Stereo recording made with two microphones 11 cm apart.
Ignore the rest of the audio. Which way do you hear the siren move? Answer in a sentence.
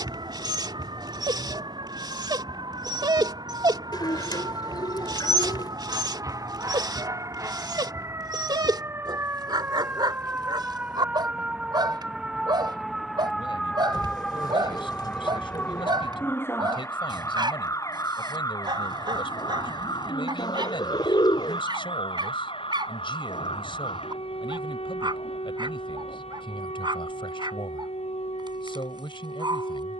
In this clip you hear the siren move from right to left.